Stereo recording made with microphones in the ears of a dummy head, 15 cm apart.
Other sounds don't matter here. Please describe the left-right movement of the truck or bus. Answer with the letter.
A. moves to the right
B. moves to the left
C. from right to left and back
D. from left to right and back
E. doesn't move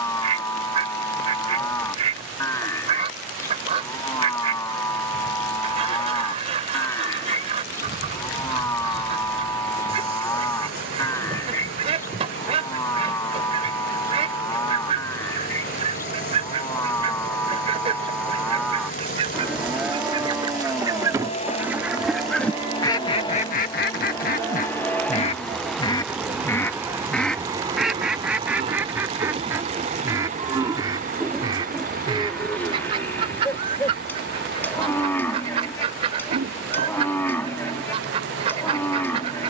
A.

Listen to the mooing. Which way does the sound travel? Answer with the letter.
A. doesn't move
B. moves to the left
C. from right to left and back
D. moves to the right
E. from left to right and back
E.